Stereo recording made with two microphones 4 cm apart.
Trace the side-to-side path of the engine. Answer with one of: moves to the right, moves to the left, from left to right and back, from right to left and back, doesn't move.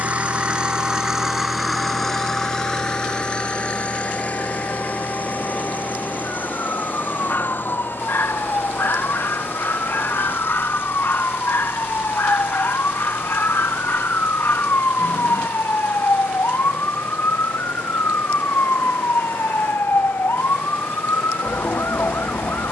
moves to the left.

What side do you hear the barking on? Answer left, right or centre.
left.